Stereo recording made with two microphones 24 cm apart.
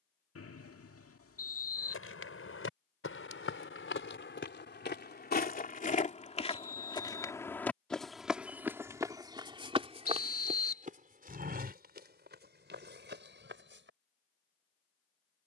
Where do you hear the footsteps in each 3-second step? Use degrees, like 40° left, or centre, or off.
60° left, 50° left, 10° left, 30° right, 50° right.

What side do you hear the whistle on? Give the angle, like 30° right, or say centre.
70° left.